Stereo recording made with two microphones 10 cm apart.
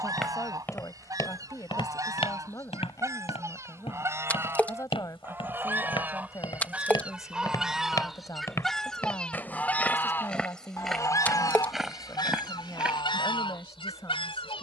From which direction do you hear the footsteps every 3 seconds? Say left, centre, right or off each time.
left, left, left, centre, centre.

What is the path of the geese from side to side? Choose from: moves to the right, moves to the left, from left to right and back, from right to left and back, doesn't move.
moves to the left.